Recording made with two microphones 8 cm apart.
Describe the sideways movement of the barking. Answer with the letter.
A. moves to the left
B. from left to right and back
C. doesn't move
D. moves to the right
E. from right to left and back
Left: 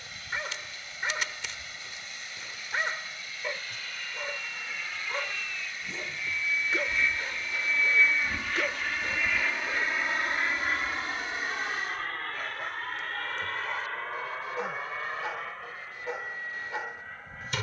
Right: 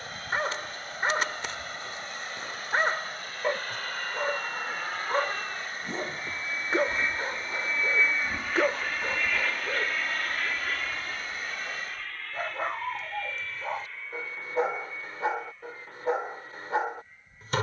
C.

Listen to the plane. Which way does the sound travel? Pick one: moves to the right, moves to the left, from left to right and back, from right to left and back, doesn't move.
moves to the left.